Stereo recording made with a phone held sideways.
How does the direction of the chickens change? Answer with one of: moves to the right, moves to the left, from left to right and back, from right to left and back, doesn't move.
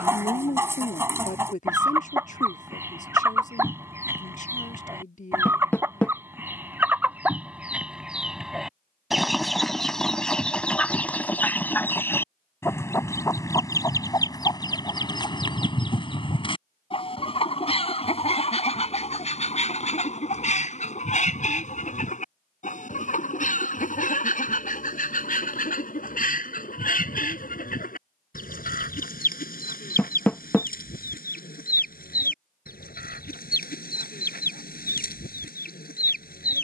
moves to the left.